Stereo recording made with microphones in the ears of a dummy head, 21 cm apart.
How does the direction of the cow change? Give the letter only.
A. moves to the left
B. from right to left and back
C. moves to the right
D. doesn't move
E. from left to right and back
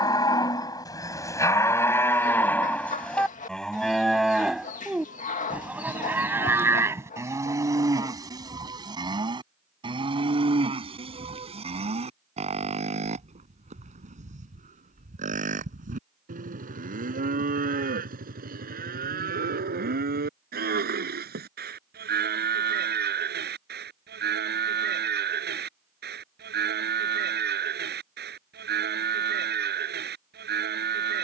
C.